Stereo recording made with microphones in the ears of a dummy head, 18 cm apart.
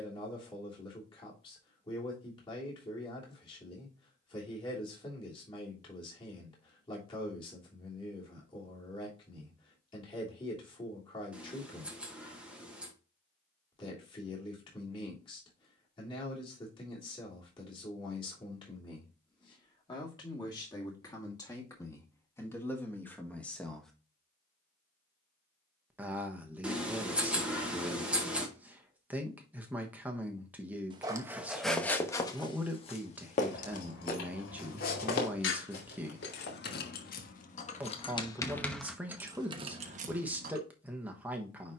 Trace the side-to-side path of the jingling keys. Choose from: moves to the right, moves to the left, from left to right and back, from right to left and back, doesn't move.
moves to the right.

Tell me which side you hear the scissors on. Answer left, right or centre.
centre.